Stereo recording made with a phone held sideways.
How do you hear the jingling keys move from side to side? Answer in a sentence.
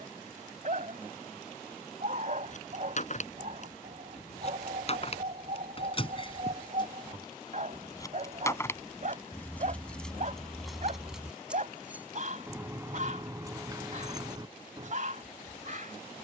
You can hear the jingling keys go from the left side to the right.